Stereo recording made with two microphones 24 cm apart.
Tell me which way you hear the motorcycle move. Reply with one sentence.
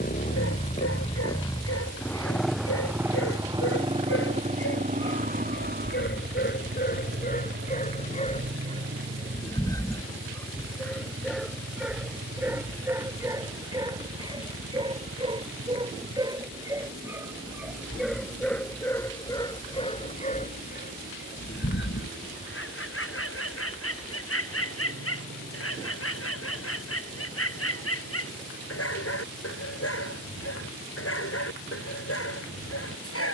You can hear the motorcycle travel towards the right.